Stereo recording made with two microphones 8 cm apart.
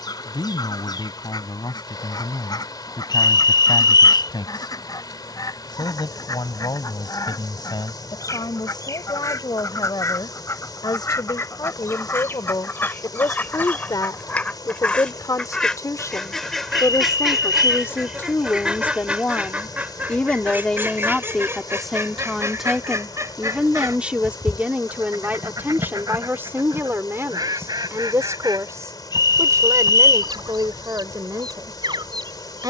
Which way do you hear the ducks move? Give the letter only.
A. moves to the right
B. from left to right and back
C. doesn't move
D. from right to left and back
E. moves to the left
A.